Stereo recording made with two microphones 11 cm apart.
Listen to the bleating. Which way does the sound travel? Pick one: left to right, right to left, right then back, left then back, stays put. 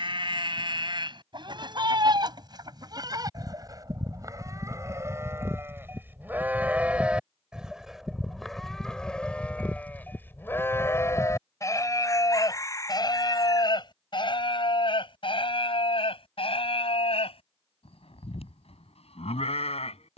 right to left.